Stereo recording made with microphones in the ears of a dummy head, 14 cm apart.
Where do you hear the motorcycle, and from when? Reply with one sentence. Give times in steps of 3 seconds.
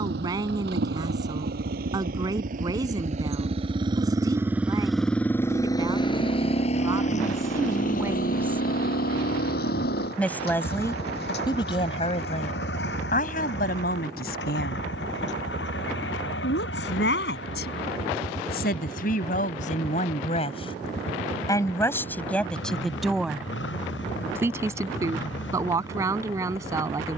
You can hear the motorcycle on the right from 0 s, in the centre from 3 s and on the left from 6 s.